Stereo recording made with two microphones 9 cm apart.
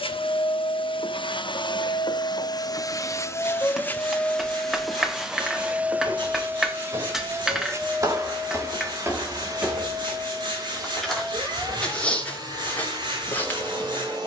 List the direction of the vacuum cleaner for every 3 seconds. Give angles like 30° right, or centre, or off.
60° left, 10° left, 30° right, 40° right, 50° right.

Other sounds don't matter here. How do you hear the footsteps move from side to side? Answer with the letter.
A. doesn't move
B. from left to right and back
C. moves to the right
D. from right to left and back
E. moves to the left
E.